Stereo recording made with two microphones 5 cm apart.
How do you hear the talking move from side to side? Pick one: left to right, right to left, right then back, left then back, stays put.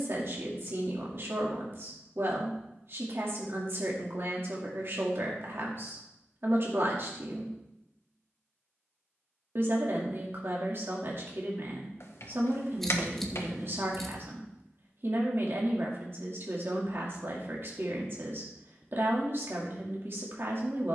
stays put.